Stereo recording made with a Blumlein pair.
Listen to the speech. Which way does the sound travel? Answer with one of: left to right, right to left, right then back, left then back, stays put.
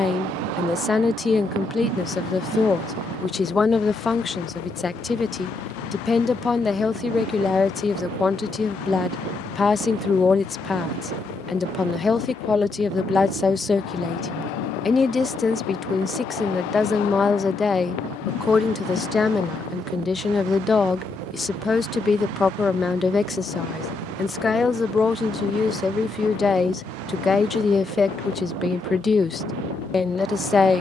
stays put.